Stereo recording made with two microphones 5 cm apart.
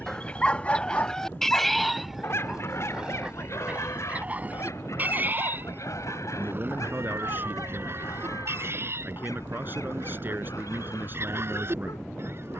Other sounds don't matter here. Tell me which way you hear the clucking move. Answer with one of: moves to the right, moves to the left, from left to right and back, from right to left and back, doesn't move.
moves to the right.